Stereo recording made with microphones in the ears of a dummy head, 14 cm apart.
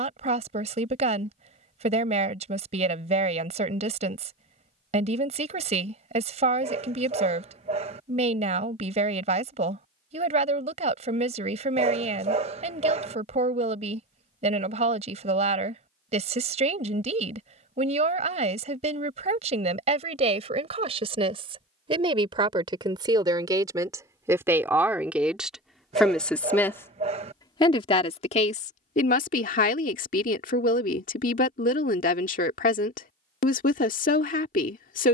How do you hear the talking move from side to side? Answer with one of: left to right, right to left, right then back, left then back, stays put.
right to left.